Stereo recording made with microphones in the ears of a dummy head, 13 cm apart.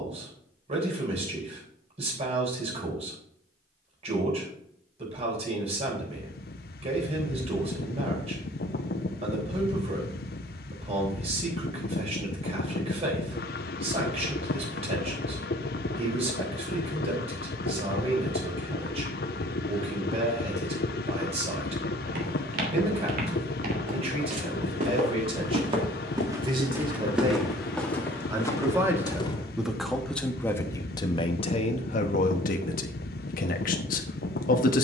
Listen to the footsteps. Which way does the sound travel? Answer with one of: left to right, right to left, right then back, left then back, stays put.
right to left.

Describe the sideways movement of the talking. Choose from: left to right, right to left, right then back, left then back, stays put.
right to left.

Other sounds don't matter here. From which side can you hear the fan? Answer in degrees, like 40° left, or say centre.
60° left.